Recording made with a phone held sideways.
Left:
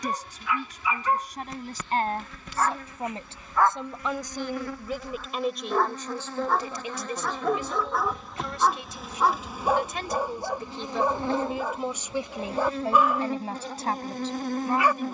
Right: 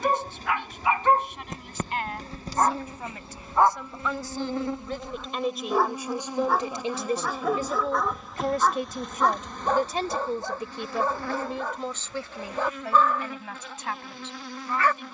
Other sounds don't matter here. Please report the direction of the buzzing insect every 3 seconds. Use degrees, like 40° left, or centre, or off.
40° right, 30° right, 10° right, 20° left, 40° left.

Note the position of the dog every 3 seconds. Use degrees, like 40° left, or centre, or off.
40° right, 20° right, centre, 10° left, 10° left.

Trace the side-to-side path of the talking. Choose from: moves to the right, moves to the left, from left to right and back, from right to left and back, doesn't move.
from left to right and back.